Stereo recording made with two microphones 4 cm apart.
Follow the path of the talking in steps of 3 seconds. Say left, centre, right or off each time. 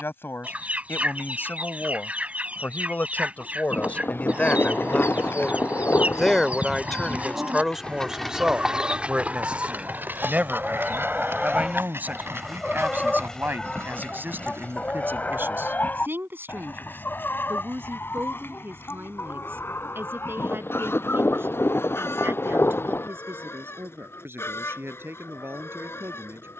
left, left, centre, right, right, right, right, right, right.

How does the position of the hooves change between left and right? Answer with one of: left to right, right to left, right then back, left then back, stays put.
left to right.